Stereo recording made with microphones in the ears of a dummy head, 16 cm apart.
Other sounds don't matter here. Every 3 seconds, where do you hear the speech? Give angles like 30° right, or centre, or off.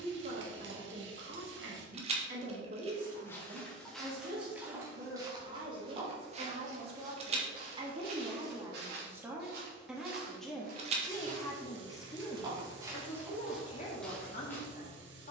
50° right, 50° right, 30° right, centre, 30° left.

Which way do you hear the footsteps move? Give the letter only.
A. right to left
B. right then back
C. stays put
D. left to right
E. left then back
B.